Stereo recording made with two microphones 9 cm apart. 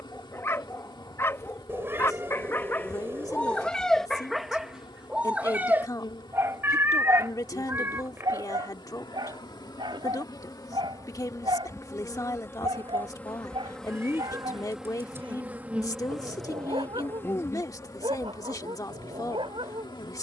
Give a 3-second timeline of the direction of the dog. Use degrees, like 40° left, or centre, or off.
30° left, centre, 40° right, 60° right, 70° right, 80° right, 80° right.